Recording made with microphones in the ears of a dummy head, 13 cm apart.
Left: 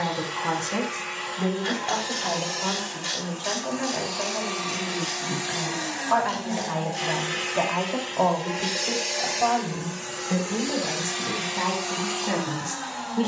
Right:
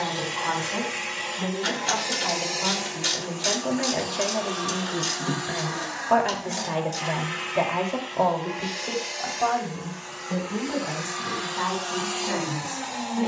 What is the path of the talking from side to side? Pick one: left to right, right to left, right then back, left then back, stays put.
right then back.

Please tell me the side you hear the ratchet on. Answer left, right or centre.
right.